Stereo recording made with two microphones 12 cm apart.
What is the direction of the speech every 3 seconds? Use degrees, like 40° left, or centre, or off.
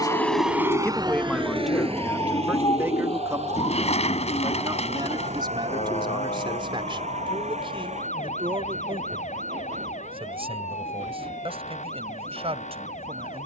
centre, 40° right, 50° right, 60° right, 60° right.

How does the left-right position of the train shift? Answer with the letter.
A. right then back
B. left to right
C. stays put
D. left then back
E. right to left
B.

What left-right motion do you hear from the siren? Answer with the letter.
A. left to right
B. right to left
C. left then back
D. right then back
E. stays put
B.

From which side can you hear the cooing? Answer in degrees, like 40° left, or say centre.
70° left.